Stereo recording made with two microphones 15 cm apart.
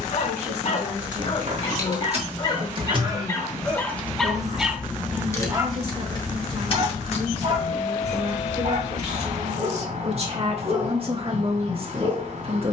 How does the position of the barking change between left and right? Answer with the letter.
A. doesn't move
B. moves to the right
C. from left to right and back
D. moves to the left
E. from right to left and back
B.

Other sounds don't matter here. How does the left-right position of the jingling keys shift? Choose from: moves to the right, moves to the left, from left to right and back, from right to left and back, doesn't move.
moves to the left.